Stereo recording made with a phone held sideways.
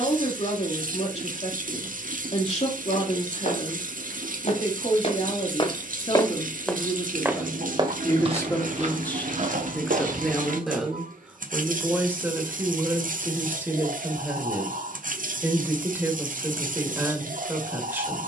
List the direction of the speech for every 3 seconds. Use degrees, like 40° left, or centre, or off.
50° left, 50° left, 30° left, centre, 10° right, 10° right.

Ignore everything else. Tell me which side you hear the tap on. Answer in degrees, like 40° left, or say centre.
70° right.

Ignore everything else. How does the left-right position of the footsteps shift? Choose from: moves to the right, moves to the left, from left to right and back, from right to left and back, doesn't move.
moves to the right.